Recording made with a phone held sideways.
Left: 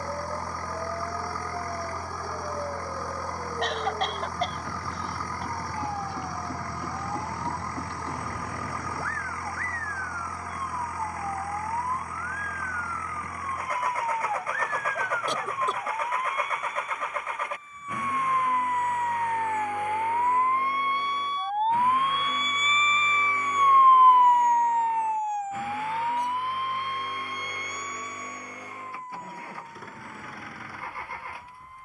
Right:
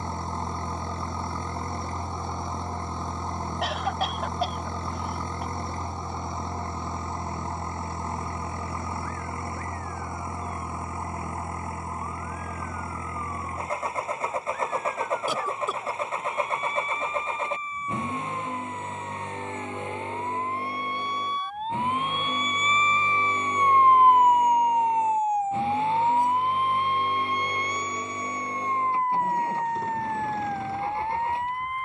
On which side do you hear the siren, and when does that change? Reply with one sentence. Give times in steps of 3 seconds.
In this clip you hear the siren on the left from 0 s and on the right from 24 s.